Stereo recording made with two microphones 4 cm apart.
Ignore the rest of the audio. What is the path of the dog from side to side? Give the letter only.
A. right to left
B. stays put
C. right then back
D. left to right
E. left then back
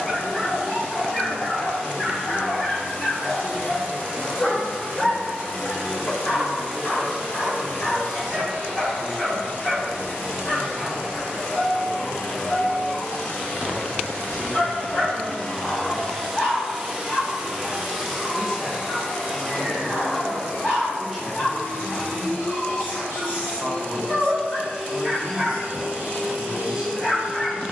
B.